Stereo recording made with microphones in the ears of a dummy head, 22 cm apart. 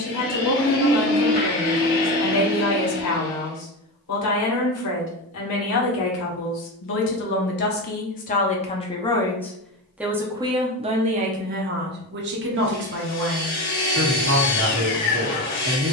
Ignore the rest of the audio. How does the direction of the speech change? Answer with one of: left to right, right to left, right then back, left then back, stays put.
left to right.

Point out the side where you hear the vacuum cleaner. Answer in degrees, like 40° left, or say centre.
40° left.